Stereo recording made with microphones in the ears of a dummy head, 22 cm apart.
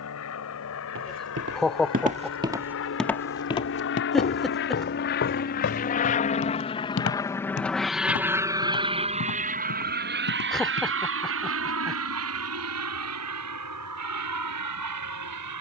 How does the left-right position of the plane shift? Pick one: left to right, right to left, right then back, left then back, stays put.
left to right.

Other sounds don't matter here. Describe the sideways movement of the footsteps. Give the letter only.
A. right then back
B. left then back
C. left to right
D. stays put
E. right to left
E.